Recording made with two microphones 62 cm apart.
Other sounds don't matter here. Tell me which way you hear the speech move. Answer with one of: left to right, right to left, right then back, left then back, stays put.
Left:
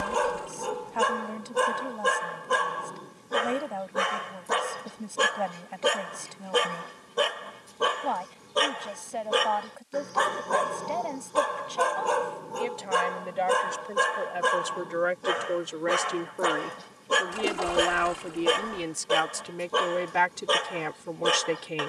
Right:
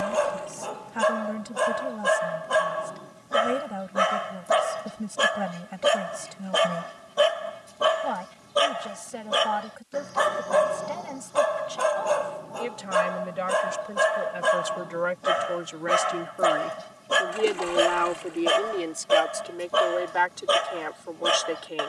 right to left.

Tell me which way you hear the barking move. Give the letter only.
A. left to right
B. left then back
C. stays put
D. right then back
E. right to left
C.